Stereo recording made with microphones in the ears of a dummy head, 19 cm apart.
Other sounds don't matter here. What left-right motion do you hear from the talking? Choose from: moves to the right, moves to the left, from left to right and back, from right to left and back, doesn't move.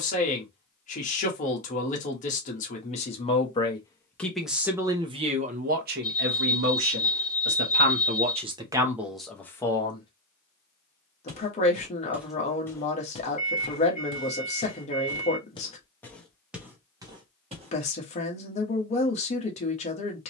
from left to right and back.